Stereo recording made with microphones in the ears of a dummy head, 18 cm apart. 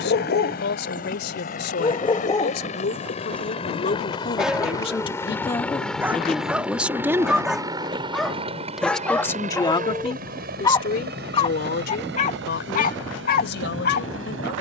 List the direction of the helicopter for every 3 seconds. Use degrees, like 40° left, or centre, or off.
40° left, 20° left, 20° right, 50° right, 60° right.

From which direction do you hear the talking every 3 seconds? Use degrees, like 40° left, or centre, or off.
60° left, 30° left, centre, 40° left, 60° left.